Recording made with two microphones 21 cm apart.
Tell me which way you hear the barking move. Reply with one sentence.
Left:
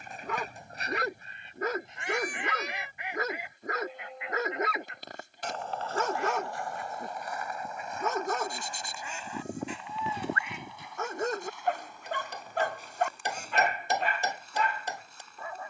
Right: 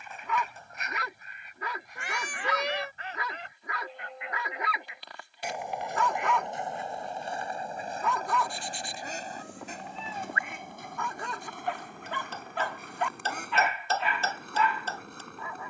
In this clip you hear the barking stay put.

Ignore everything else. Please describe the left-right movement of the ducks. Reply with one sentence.
You can hear the ducks move to the right.